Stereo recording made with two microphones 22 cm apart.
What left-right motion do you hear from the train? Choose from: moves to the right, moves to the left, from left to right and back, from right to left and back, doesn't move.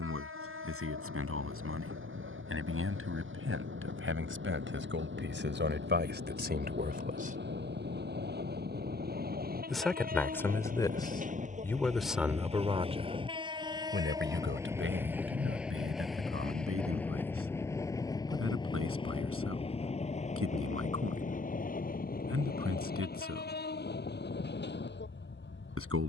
moves to the left.